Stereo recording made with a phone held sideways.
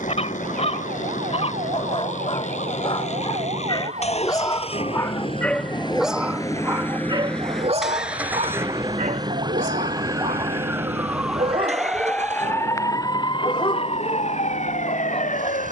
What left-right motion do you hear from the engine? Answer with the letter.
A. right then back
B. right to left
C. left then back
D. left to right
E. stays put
D.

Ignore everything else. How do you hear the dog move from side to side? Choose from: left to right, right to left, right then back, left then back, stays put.
right then back.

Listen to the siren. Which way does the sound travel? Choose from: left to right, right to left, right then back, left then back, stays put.
right to left.